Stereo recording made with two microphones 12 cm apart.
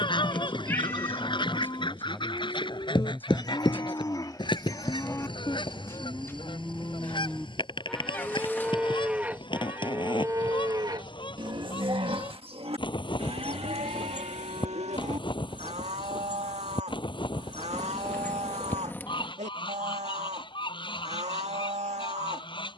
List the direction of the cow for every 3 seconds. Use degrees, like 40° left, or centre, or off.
40° left, 30° left, 10° left, 30° right, 60° right, 70° right, 70° right, 70° right.